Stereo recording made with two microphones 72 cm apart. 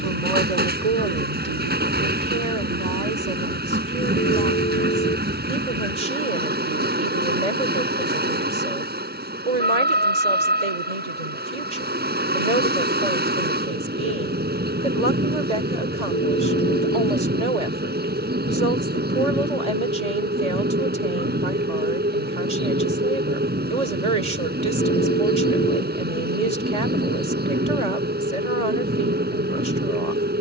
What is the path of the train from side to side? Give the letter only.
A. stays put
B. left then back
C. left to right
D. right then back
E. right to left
A.